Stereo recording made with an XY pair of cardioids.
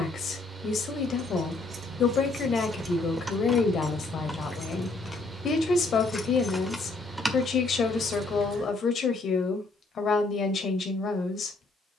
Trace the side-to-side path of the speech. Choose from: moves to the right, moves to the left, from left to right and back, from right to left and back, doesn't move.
doesn't move.